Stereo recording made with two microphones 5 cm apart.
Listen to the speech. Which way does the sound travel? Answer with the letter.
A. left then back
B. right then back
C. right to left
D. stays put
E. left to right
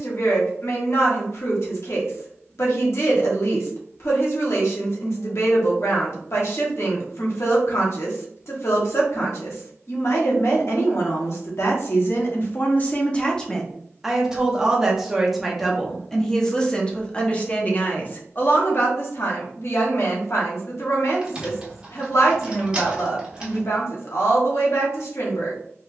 B.